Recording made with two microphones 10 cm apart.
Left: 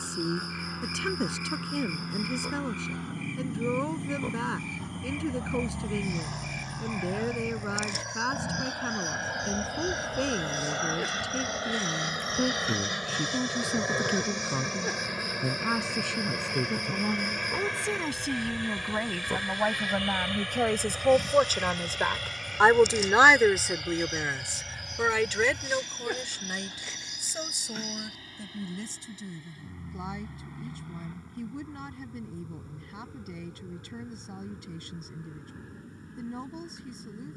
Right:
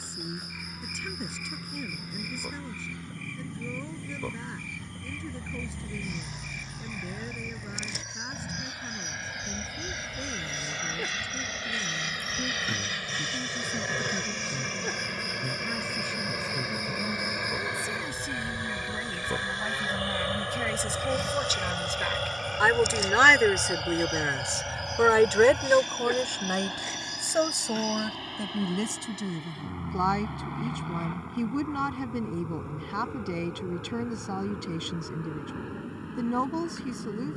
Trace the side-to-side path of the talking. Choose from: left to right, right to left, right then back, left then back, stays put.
left to right.